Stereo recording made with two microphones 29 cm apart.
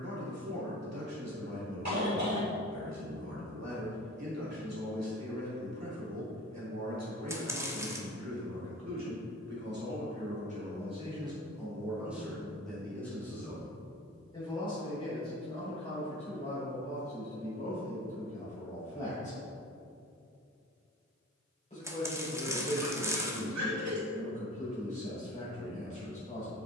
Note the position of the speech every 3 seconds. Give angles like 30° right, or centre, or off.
60° right, 60° right, 60° right, 30° right, 10° left, 20° left, 20° left, 20° left, 20° left.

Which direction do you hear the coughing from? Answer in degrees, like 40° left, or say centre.
70° right.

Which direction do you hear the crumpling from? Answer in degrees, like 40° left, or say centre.
10° right.